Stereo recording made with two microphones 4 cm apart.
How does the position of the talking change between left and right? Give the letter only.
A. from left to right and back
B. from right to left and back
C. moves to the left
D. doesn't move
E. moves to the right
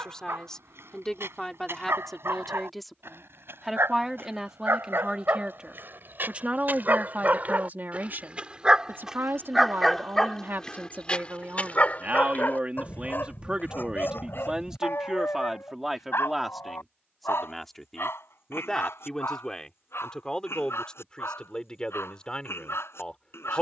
A.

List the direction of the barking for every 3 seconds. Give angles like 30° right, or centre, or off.
70° right, 60° right, 40° right, 20° left, 50° left, 70° left, 70° left, 80° left.